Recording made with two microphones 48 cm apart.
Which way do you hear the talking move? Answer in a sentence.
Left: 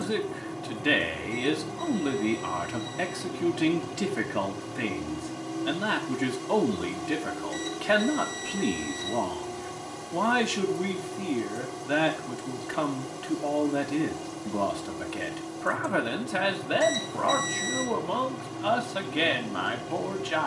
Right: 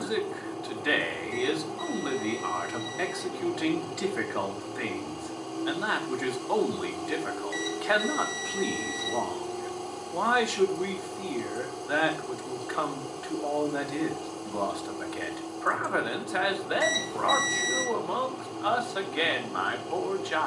In this clip you hear the talking stay in one place.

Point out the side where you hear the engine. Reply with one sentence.
You can hear the engine on the left.